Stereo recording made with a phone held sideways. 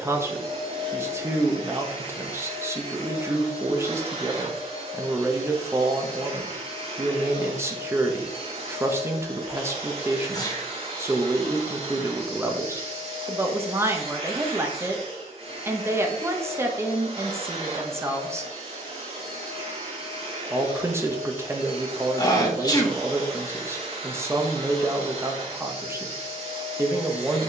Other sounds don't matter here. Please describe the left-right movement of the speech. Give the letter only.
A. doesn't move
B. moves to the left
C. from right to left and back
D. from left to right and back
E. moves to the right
A.